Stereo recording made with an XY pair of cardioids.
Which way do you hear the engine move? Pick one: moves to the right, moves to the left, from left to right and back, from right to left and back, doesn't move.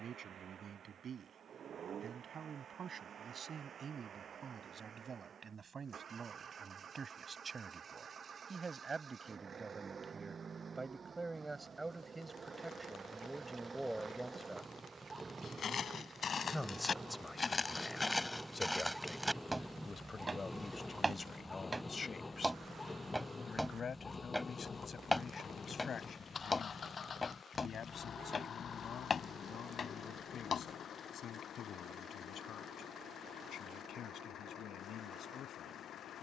moves to the left.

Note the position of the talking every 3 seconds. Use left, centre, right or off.
right, right, right, right, centre, centre, left, left, left, left, left, left.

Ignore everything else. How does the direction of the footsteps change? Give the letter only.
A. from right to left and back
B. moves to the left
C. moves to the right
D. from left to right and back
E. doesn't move
D.